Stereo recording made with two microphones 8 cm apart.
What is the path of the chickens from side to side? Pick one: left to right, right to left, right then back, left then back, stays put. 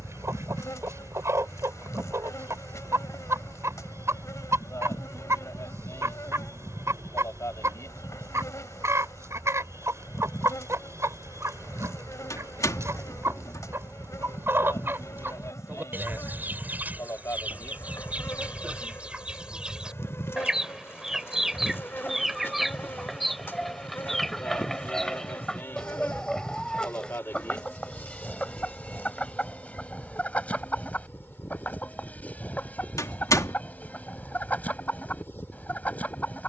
right to left.